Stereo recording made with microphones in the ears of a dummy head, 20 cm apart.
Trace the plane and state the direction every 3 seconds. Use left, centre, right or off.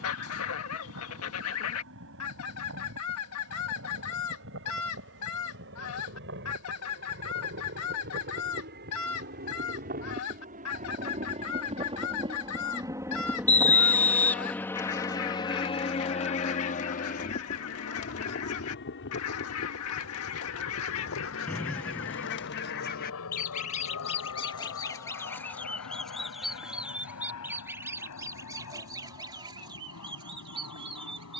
right, right, right, right, centre, left, left, left, left, left, left.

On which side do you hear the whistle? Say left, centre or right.
centre.